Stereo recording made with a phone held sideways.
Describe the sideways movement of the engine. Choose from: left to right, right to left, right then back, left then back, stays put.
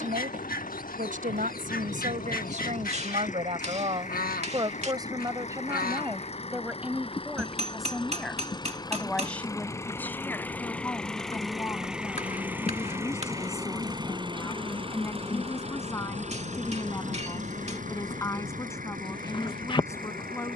left to right.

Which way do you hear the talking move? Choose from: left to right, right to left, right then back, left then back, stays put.
right to left.